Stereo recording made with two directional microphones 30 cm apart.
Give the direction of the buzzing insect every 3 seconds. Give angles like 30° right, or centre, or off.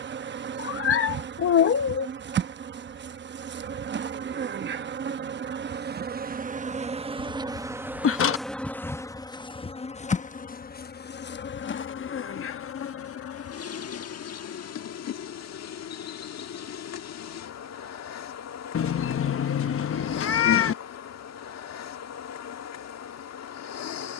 40° right, 40° right, 10° right, 30° left, 50° left, 60° left, 60° left, 60° left.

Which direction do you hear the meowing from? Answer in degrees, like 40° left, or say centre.
50° left.